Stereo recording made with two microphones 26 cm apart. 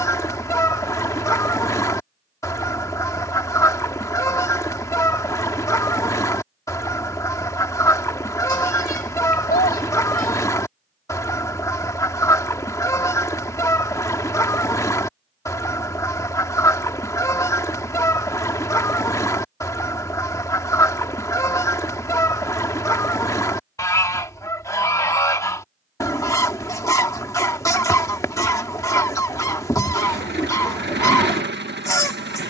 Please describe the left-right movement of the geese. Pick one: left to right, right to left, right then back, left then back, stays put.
stays put.